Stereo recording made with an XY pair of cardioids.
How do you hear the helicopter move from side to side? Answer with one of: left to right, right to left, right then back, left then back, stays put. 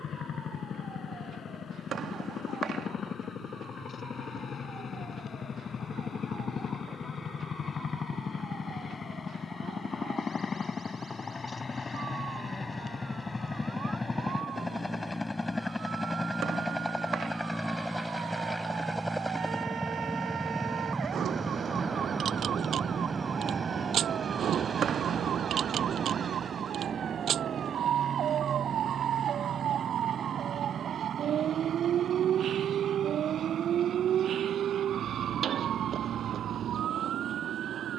left to right.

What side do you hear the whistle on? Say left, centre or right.
right.